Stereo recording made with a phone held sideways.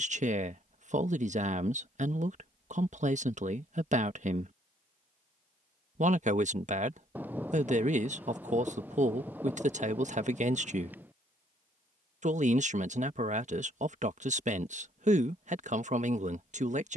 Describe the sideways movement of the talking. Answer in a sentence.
You can hear the talking stay put.